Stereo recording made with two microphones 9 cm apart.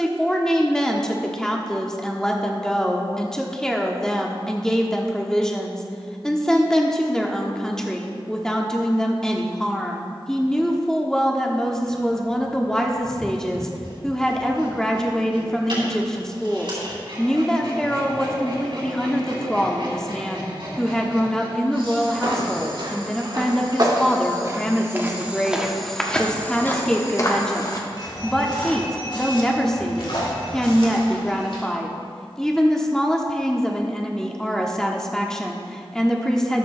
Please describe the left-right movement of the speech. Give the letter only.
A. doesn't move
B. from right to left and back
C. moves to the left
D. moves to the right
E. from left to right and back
A.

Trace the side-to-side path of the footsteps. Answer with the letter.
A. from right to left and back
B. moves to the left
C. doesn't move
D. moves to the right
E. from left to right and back
B.